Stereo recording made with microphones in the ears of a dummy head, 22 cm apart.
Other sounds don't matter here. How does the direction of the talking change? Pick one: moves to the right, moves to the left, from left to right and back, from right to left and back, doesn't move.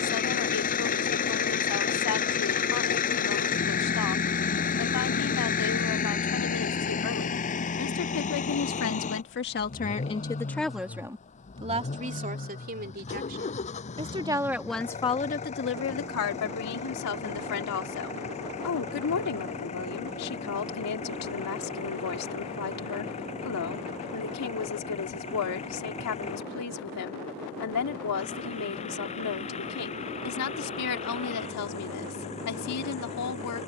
from left to right and back.